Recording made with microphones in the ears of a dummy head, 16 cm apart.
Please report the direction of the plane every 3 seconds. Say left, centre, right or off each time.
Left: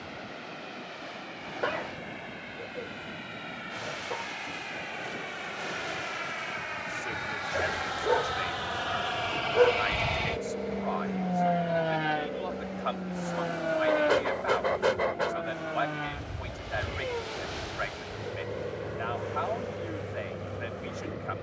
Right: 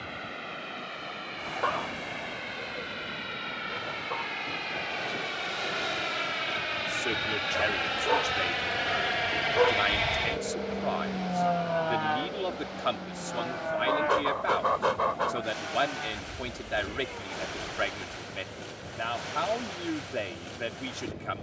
right, right, right, centre, left, left, left.